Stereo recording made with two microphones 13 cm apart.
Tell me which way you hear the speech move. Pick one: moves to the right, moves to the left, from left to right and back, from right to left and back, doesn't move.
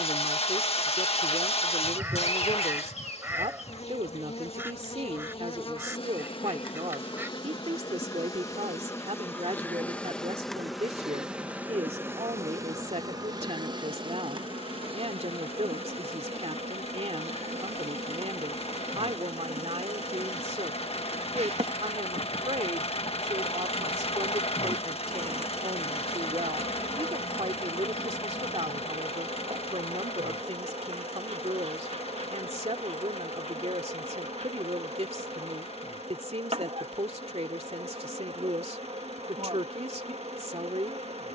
doesn't move.